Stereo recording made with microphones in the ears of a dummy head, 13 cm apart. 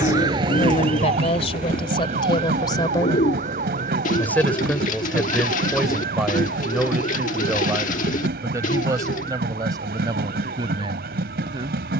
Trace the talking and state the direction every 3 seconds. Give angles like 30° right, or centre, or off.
40° left, 10° left, 10° right, 30° right.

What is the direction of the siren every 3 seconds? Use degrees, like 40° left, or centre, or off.
40° right, 50° right, 50° right, 60° right.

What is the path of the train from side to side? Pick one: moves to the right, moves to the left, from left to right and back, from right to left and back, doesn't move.
doesn't move.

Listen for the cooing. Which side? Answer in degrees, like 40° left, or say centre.
50° left.